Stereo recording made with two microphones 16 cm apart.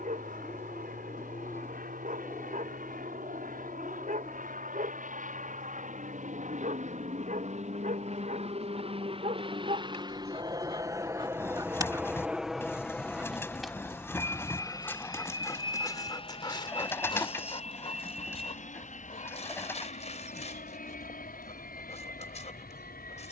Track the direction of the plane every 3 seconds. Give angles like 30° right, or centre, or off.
70° right, 60° right, 50° right, 20° right, 10° left, 30° left, 50° left, 60° left.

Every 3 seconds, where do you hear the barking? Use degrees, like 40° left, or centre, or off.
60° right, 60° right, 60° right, 40° right, centre, 30° left, 40° left, 40° left.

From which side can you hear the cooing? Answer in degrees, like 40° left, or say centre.
10° left.